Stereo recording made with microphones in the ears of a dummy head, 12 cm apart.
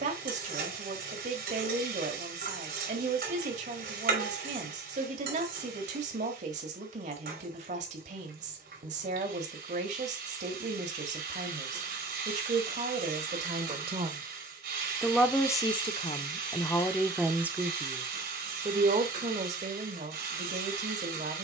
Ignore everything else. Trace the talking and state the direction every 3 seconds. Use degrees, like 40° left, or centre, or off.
50° right, 50° right, 50° right, 50° right, 50° right, 10° left, 50° right.